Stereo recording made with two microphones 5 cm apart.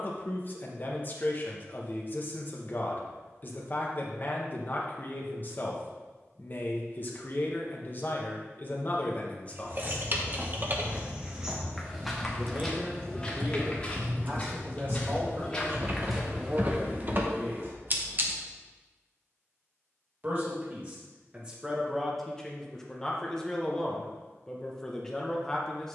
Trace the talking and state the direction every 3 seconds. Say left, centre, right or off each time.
left, left, left, left, right, right, right, centre, centre.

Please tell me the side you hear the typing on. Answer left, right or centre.
right.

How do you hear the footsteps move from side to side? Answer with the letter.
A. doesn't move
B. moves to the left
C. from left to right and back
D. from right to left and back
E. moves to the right
D.